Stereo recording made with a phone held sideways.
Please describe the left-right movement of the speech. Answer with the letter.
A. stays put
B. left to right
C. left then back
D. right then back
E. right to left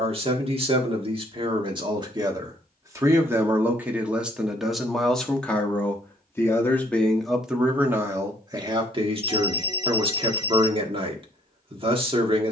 C.